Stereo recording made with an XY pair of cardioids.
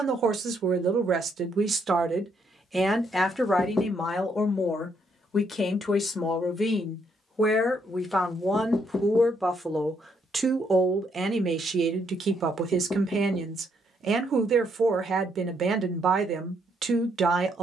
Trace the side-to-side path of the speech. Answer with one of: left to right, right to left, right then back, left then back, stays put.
left then back.